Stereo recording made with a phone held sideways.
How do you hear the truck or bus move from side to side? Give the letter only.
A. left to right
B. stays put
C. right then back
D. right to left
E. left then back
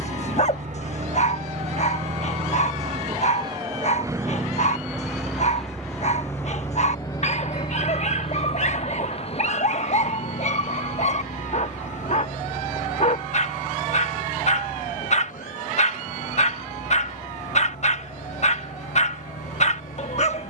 D.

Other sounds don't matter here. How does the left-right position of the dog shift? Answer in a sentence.
You can hear the dog stay in one place.